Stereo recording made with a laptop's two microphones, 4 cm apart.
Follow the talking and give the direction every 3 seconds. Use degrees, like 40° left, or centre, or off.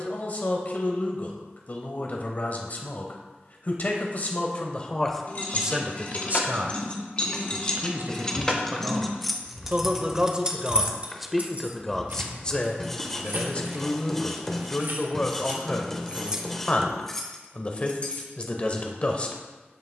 40° left, 20° left, 50° right, 20° right, 20° left, 30° left, 30° left.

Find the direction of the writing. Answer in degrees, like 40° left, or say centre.
10° left.